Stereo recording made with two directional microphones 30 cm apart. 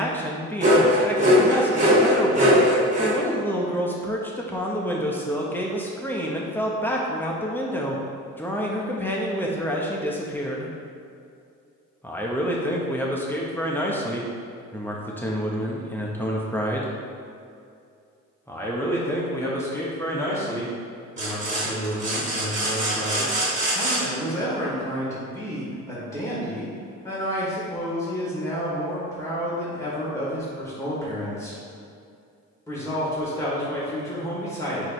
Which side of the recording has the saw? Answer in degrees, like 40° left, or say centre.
20° right.